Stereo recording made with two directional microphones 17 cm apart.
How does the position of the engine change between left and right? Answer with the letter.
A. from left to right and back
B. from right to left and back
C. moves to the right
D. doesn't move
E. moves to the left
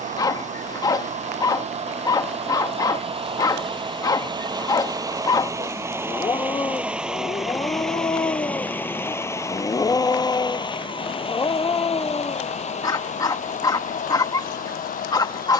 E.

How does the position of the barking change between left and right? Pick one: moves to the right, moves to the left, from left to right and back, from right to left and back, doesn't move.
doesn't move.